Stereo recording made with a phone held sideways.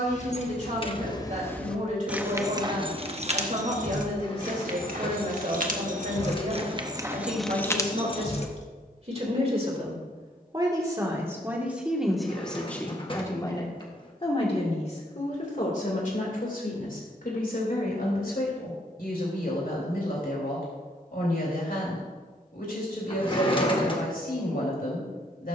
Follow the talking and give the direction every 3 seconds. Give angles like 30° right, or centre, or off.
50° right, 50° right, 50° right, 20° right, 20° left, 60° left, 70° left, 70° left, 70° left.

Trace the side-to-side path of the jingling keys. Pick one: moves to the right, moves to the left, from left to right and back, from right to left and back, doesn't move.
from left to right and back.